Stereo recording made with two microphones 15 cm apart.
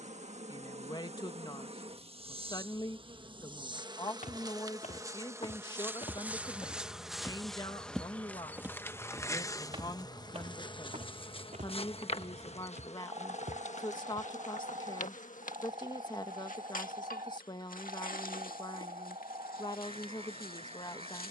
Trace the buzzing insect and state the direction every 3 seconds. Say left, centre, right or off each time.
right, right, centre, left, left, left, left.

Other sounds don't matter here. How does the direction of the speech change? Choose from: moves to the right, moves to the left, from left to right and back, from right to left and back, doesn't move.
doesn't move.